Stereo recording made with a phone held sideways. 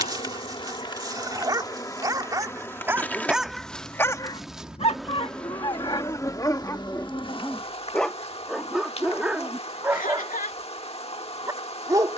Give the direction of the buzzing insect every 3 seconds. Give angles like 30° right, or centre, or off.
20° left, centre, 30° left, 40° left.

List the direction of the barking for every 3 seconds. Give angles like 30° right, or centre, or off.
20° right, 20° left, 10° left, 10° right.